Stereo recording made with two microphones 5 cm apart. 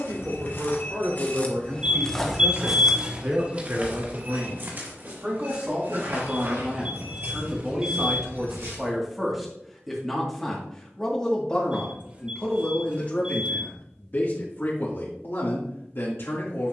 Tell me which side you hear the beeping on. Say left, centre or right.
right.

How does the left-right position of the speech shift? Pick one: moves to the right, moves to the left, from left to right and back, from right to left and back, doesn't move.
moves to the left.